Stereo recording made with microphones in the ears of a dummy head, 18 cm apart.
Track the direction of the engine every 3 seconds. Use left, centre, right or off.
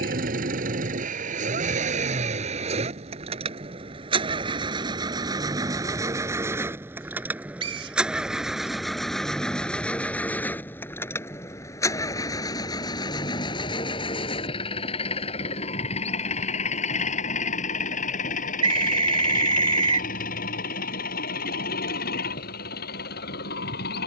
right, right, centre, centre, left, left, left, left.